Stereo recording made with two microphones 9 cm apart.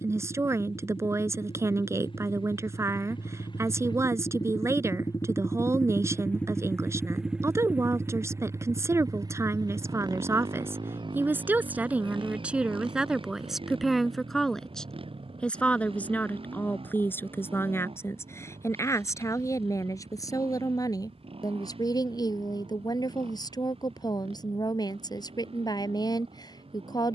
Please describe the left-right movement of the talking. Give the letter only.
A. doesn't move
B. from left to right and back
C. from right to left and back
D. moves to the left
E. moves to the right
D.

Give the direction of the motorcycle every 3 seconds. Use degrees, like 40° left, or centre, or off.
70° left, 50° left, 10° right, 50° right, 70° right, 70° right, 80° right, 80° right, 80° right.